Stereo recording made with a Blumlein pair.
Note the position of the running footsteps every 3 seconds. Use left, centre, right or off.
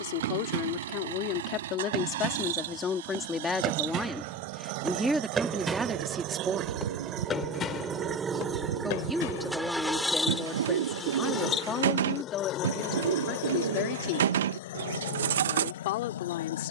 right, right, left, left, off, off.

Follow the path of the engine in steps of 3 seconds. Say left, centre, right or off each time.
right, right, right, centre, left, left.